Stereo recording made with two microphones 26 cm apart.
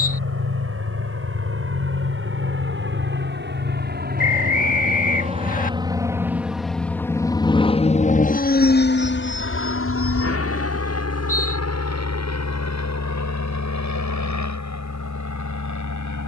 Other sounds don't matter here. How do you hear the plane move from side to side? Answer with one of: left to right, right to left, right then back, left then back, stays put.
right to left.